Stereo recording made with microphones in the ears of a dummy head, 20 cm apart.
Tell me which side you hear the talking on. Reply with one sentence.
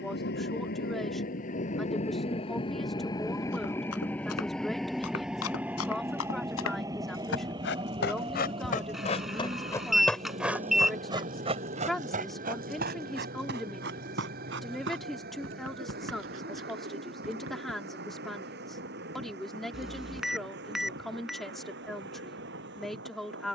In this clip you hear the talking in the centre.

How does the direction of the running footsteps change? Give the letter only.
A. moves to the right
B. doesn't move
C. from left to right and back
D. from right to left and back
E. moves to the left
A.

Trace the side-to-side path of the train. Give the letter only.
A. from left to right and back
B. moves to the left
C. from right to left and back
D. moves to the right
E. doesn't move
D.